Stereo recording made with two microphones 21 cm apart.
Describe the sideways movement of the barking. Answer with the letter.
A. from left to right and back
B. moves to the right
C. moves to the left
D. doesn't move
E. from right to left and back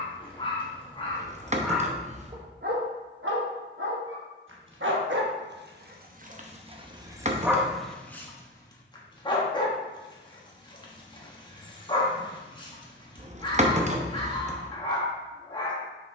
A.